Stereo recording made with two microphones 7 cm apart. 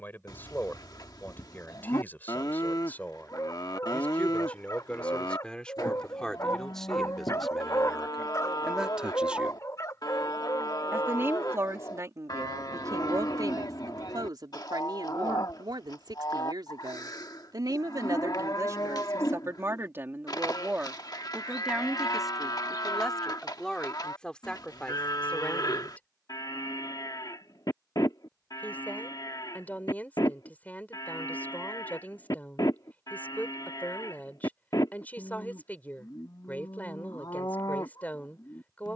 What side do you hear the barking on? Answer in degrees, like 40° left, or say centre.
50° left.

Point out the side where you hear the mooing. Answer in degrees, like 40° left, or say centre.
60° left.